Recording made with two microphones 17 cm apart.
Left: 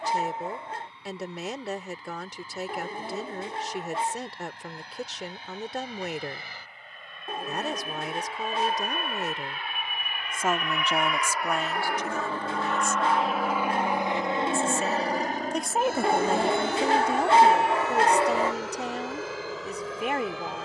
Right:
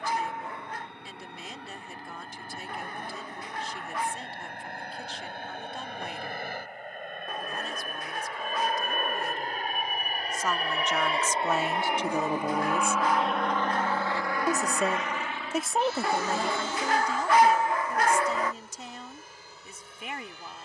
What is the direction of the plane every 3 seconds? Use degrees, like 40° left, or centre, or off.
70° right, 60° right, 50° right, 40° right, 10° left, 50° left, 70° left.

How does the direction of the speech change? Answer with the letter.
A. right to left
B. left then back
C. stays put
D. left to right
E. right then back
E.